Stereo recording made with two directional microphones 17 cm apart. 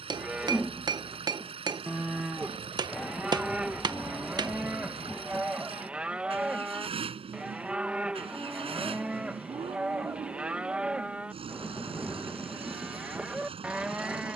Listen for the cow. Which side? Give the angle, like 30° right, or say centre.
10° right.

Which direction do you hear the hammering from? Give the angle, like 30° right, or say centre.
20° right.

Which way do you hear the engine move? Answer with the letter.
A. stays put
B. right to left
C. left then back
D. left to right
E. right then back
A.